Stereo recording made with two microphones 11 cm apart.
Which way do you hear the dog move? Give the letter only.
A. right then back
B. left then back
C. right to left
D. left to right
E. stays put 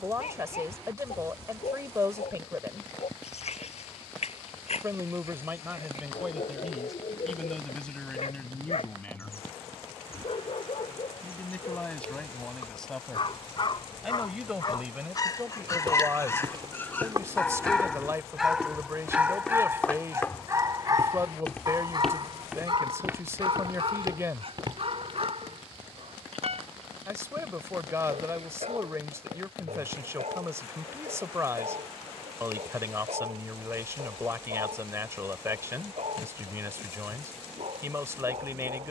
D.